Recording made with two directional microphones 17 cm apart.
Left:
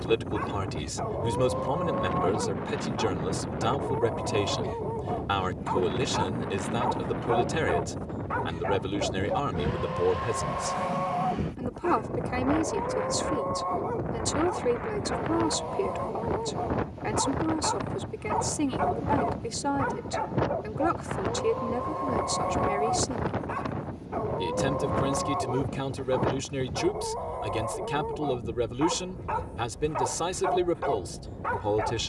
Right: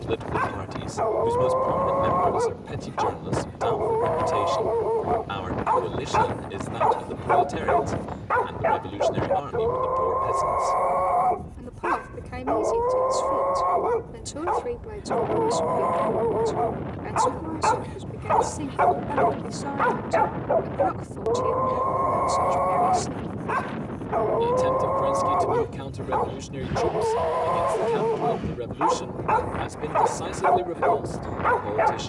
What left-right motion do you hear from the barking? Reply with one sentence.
You can hear the barking stay in one place.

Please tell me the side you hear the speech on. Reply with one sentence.
You can hear the speech on the left.